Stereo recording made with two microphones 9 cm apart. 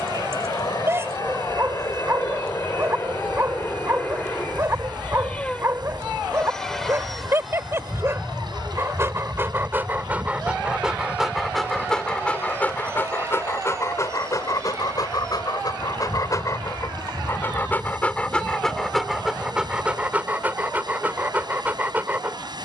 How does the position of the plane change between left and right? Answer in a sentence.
In this clip you hear the plane go from the left side to the right.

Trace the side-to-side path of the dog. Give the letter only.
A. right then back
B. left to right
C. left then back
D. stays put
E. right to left
C.